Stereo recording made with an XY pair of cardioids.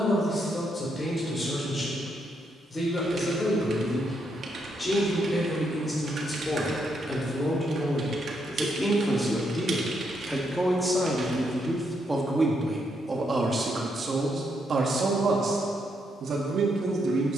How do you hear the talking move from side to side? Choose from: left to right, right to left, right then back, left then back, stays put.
left to right.